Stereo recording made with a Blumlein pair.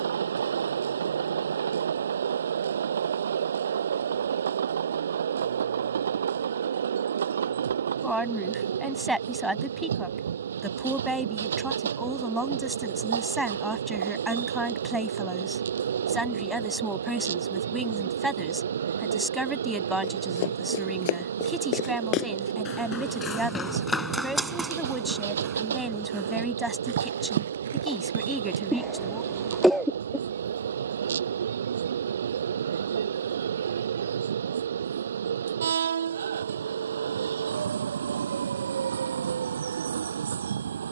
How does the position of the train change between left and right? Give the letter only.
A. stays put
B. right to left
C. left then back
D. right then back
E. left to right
A.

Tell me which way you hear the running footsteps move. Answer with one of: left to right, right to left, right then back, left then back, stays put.
left to right.